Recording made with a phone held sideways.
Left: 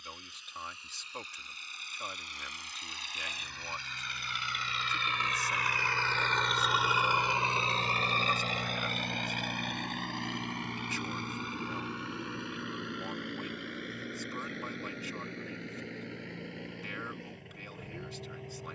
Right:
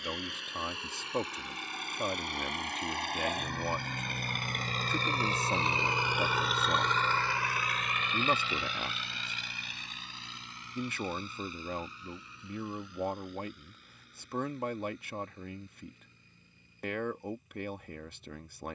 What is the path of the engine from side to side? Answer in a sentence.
In this clip you hear the engine move to the left.